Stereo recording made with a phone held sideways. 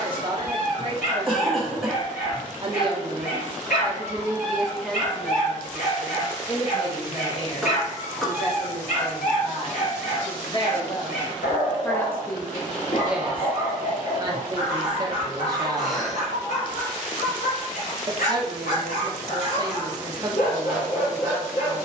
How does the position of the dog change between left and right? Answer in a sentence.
You can hear the dog stay in one place.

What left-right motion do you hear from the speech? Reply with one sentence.
In this clip you hear the speech go left and come back.